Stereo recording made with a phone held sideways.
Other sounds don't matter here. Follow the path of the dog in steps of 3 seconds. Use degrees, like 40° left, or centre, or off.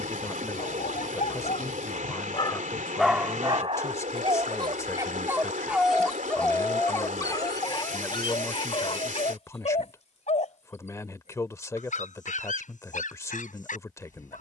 50° left, 20° right, 30° left, 50° left, 60° left.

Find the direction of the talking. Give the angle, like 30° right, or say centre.
20° left.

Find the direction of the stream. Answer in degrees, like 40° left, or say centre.
60° right.